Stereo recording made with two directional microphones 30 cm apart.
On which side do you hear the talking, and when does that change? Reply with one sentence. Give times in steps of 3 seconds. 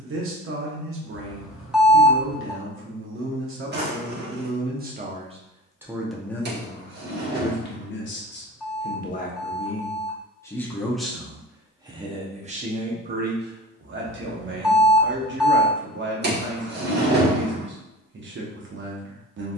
In this clip you hear the talking on the right from 0 s, on the left from 6 s, in the centre from 9 s and on the right from 12 s.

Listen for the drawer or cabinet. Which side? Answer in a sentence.
You can hear the drawer or cabinet on the right.